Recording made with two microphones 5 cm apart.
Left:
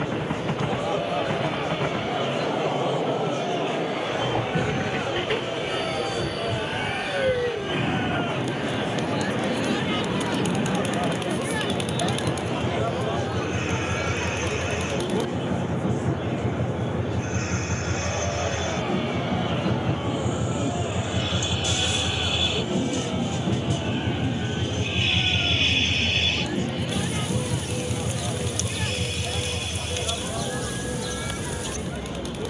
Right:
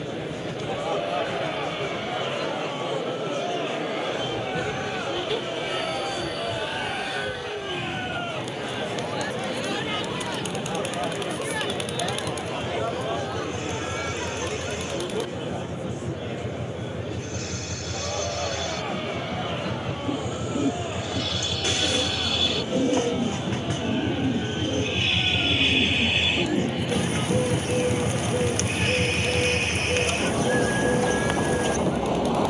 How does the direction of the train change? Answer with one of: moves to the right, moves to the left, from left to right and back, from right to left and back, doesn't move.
moves to the right.